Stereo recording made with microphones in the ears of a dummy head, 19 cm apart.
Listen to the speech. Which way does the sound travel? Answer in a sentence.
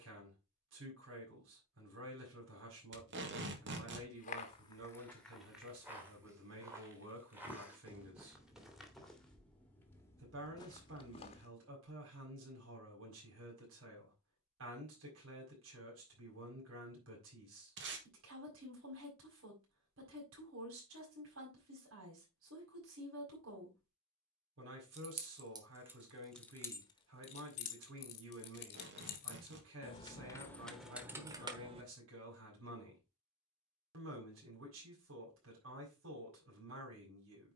You can hear the speech stay in one place.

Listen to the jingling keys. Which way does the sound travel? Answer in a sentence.
In this clip you hear the jingling keys move from right to left and back again.